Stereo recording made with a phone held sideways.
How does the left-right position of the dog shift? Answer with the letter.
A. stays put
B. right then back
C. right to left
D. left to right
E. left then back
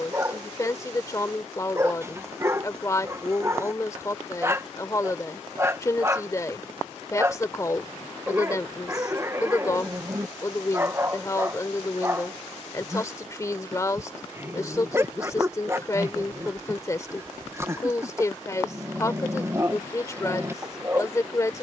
A.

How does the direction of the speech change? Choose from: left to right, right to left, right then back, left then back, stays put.
stays put.